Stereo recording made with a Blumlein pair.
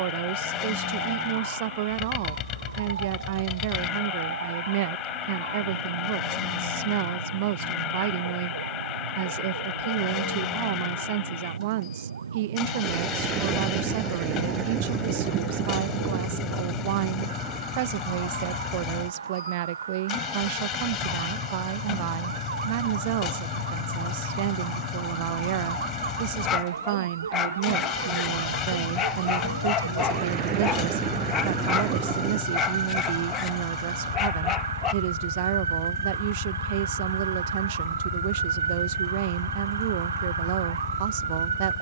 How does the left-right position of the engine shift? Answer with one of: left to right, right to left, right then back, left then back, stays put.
stays put.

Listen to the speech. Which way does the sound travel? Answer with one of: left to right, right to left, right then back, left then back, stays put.
stays put.